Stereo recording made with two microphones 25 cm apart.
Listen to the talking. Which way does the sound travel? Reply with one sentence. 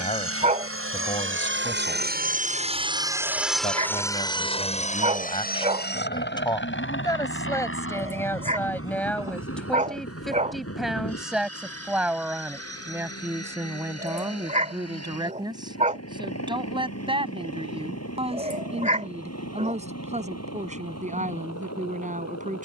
In this clip you hear the talking travel towards the right.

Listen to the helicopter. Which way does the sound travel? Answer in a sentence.
You can hear the helicopter travel towards the left.